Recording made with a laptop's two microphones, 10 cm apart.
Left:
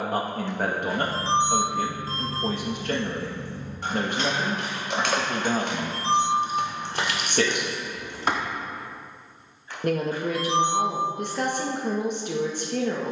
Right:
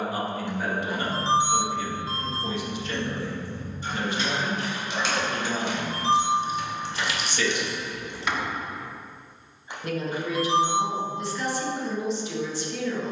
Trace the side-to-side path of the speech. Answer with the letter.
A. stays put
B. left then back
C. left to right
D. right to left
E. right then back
A.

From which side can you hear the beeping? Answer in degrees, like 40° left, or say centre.
20° right.